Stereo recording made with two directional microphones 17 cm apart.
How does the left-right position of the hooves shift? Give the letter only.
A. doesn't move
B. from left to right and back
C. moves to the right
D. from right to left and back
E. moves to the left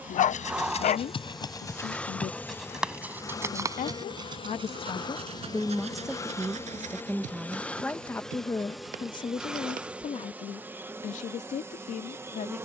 C.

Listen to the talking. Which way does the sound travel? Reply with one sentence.
In this clip you hear the talking go right and come back.